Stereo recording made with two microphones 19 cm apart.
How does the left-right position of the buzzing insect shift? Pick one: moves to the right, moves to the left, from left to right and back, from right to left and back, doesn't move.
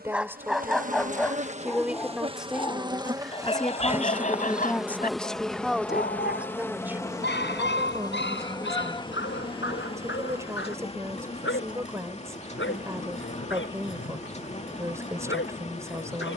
moves to the left.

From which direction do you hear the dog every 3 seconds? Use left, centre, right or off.
centre, left, left, left, left, left.